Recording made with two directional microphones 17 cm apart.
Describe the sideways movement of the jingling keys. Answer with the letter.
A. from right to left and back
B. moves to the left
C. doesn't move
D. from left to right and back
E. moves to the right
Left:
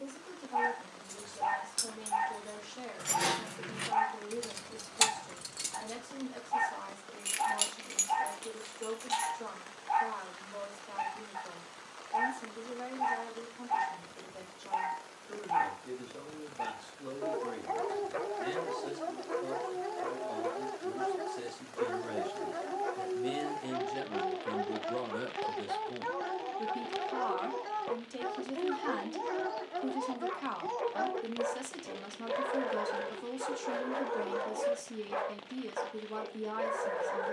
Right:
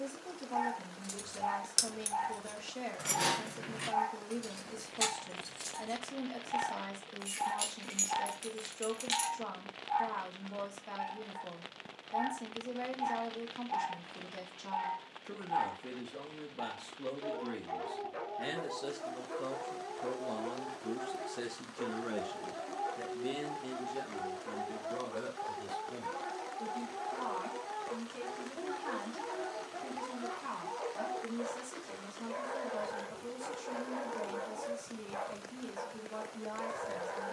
A.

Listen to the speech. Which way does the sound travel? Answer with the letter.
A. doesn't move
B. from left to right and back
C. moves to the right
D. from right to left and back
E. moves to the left
E.